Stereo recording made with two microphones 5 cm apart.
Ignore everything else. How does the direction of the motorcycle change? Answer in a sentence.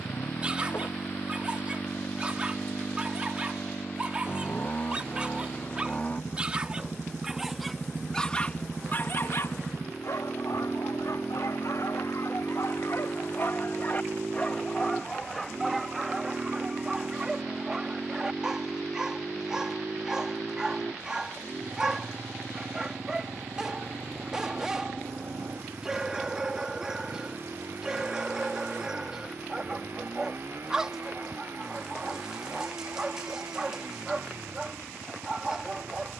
You can hear the motorcycle go from the left side to the right.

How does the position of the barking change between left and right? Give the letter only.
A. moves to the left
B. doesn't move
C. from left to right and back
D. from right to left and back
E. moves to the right
D.